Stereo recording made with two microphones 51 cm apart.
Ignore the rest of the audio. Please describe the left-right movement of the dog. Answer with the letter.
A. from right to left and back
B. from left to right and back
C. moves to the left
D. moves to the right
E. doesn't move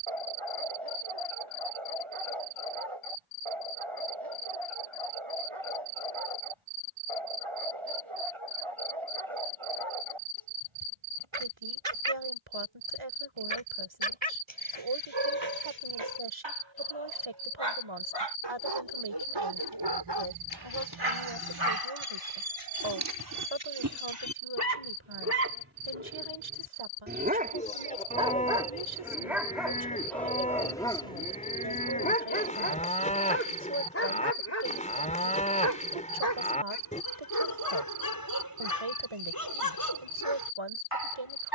C.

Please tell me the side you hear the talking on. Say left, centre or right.
right.